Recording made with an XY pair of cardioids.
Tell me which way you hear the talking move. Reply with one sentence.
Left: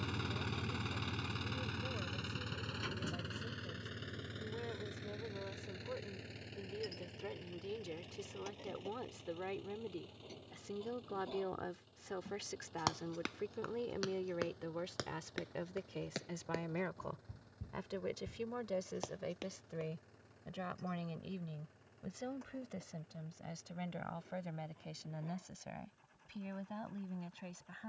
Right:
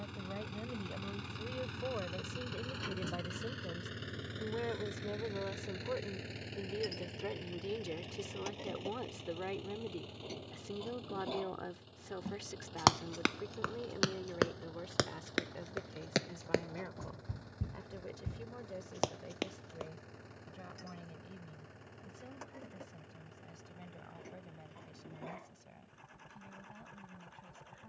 In this clip you hear the talking go from the right side to the left.